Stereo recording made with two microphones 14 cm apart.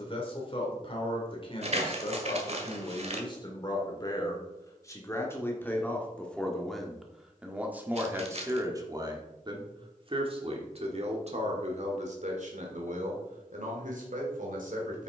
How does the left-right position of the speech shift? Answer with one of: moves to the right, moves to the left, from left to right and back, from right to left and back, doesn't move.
moves to the right.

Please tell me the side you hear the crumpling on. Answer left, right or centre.
right.